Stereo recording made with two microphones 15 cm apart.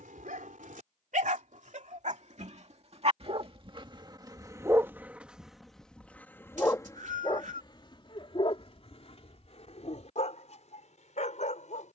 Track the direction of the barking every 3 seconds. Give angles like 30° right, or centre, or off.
60° right, 20° right, 30° left, 50° left.